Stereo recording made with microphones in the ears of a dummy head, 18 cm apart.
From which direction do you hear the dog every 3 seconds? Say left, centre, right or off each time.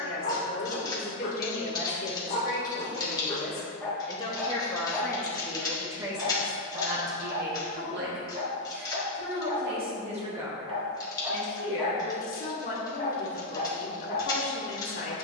left, centre, right, right, left.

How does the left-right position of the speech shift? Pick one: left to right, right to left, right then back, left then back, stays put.
right then back.